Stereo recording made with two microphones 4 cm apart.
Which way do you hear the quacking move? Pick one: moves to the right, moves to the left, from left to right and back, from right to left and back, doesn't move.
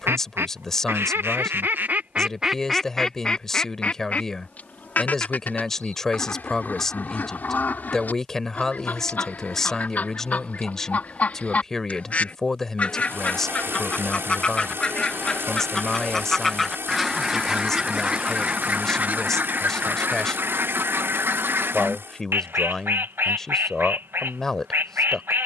from right to left and back.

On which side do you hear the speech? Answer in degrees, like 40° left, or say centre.
10° left.